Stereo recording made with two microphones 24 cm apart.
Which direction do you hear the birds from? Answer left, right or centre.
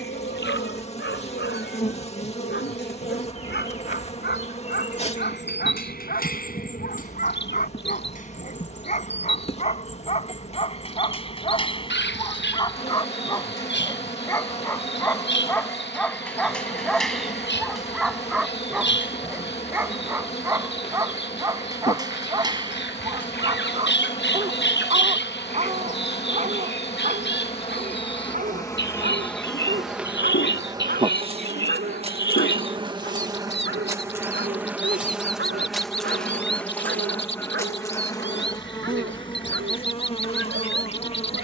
left.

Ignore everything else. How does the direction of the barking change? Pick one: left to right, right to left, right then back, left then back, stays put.
left to right.